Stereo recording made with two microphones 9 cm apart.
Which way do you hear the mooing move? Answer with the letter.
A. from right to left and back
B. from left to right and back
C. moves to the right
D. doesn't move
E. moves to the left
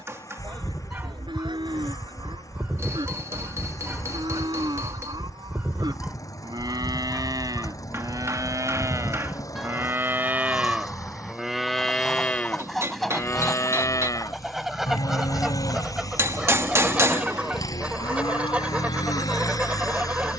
E.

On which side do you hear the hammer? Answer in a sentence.
In this clip you hear the hammer on the right.